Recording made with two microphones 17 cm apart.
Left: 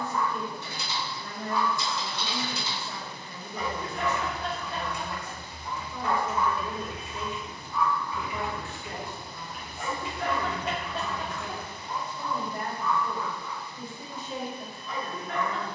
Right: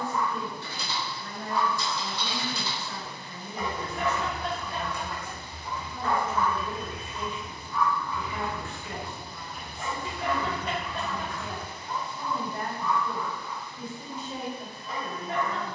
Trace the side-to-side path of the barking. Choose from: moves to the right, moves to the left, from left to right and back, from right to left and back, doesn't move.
from right to left and back.